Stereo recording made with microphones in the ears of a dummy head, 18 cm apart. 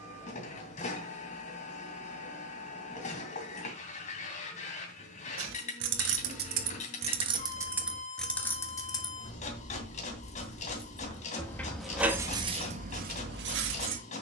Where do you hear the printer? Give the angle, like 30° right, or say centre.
40° left.